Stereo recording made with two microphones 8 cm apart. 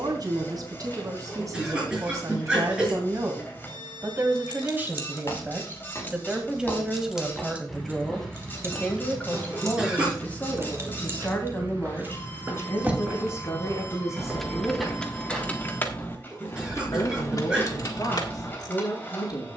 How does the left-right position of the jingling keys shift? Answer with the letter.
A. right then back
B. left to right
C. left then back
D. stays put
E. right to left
A.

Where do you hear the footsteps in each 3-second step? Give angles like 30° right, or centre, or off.
off, 40° left, 10° left, 20° right, 20° right, 20° left, off.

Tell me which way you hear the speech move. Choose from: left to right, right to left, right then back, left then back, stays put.
right to left.